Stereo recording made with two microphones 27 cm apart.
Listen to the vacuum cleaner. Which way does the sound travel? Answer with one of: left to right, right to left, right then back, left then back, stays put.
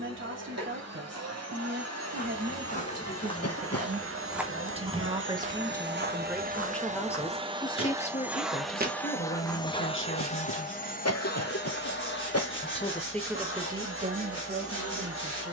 right to left.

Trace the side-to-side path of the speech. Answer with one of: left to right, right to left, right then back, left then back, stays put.
left then back.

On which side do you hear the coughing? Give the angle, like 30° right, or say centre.
70° left.